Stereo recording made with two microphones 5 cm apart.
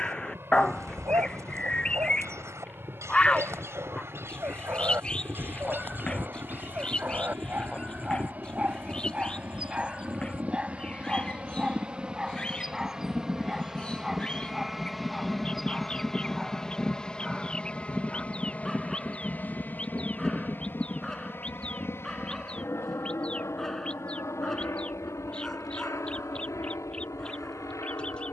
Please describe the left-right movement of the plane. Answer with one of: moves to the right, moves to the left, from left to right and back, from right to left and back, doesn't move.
moves to the left.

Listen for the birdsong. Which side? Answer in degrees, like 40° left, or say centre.
20° left.